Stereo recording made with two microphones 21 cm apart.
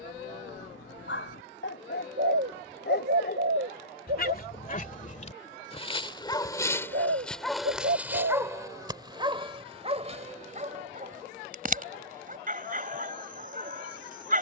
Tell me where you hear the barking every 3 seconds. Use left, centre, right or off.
left, left, centre, right, right.